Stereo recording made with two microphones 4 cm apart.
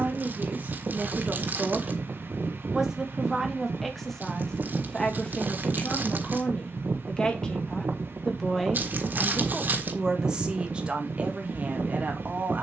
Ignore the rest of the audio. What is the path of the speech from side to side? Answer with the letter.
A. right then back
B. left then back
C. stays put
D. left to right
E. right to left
B.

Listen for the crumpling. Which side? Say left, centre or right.
right.